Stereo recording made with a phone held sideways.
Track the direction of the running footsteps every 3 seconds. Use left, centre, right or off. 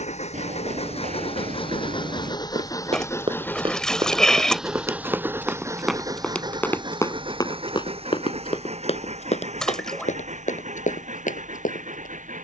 right, right, left, left.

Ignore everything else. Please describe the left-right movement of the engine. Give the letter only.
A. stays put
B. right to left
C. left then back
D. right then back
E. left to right
E.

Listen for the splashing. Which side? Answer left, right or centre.
centre.